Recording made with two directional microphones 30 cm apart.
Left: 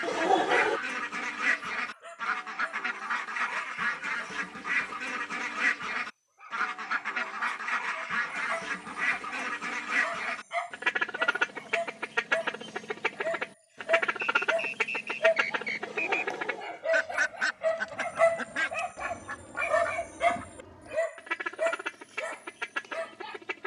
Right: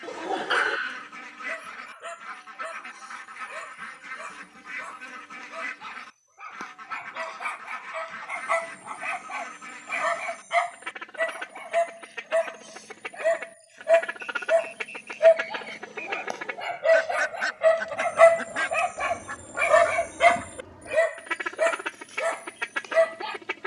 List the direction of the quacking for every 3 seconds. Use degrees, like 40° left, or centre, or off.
60° left, 60° left, 60° left, 60° left, 50° left, 20° left, 10° right, 20° right.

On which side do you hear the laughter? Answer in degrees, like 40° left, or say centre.
40° left.